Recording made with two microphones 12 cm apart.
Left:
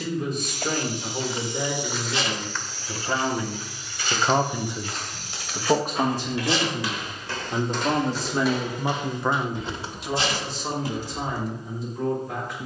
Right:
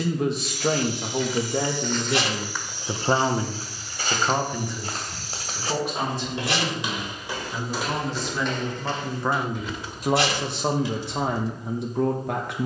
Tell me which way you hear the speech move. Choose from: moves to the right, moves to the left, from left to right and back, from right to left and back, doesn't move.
from right to left and back.